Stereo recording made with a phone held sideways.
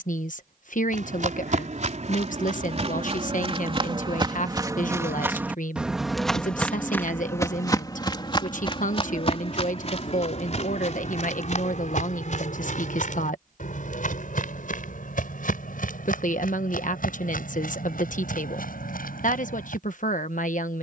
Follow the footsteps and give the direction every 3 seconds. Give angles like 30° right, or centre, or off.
50° right, 30° right, 20° left, 50° left, 60° left, 70° left, 70° left.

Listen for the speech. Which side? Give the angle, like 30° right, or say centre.
60° left.